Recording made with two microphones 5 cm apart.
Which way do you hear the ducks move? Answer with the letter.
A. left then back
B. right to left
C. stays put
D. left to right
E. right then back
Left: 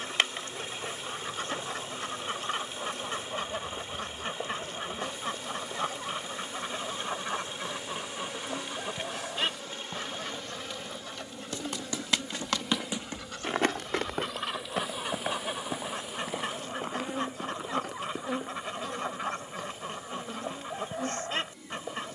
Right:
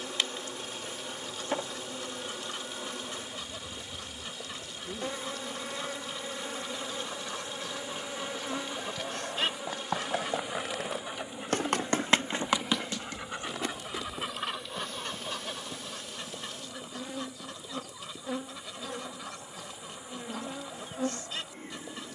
E.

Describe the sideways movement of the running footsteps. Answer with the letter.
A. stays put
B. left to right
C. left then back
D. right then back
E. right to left
E.